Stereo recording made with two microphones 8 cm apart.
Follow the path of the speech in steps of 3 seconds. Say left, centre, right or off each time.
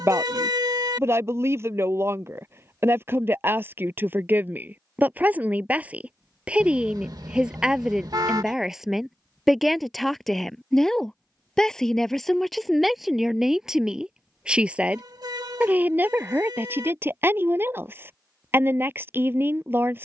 right, right, centre, centre, centre, right, right.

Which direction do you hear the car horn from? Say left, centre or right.
right.